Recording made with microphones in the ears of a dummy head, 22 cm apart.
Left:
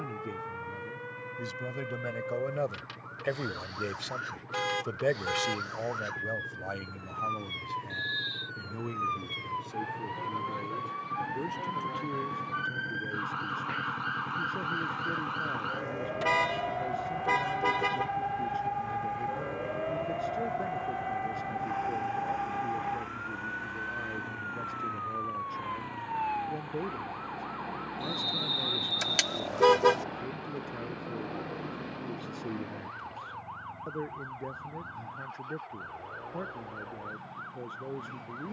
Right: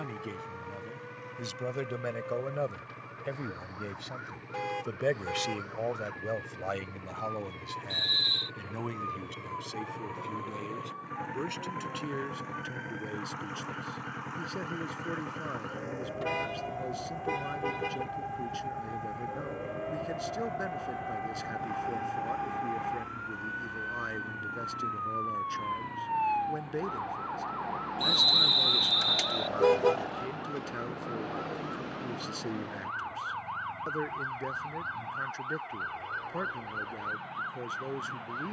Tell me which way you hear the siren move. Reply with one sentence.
You can hear the siren go from the left side to the right.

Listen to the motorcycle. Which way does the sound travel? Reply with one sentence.
In this clip you hear the motorcycle move to the left.